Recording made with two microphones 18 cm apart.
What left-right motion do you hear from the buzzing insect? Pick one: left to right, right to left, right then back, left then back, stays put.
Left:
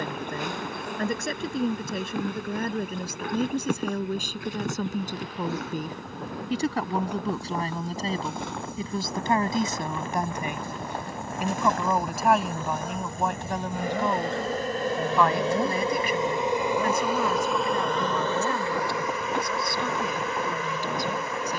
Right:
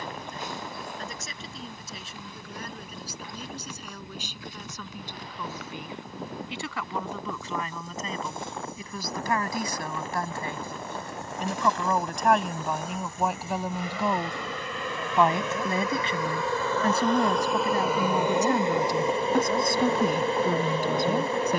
left to right.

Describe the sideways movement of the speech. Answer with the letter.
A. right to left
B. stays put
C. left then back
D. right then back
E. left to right
E.